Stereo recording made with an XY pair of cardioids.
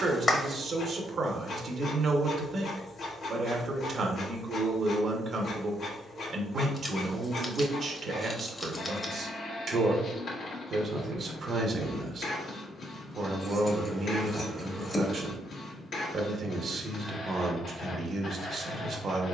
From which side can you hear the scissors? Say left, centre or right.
left.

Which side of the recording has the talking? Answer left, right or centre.
right.